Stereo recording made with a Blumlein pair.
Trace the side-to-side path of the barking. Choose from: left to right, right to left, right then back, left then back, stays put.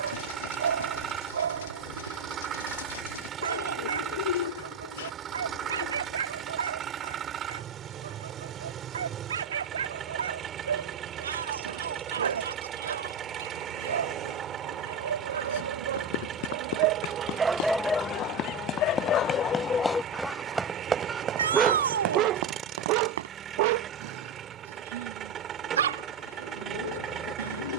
left then back.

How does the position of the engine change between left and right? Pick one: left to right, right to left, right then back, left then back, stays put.
stays put.